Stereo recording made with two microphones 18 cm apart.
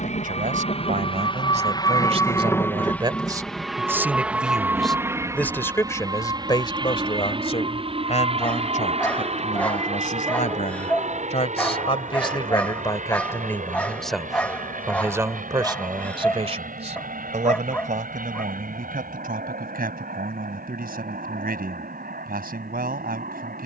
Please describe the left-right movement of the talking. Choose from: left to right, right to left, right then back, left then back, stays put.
left then back.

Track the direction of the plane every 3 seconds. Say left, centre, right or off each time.
left, centre, right, right, right, right, right, right.